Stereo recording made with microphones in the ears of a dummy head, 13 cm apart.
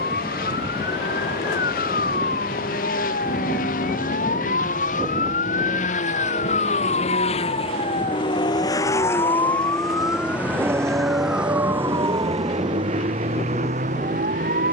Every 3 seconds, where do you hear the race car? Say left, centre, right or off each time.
left, left, left, centre, right.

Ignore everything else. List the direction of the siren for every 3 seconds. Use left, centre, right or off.
left, left, left, centre, right.